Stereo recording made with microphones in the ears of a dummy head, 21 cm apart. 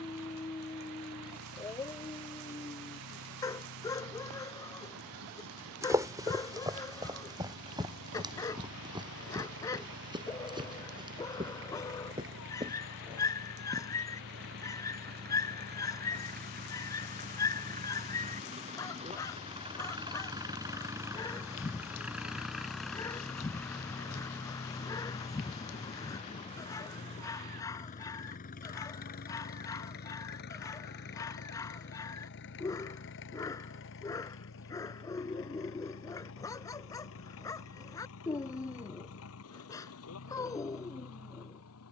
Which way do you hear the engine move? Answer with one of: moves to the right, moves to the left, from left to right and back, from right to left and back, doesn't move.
moves to the left.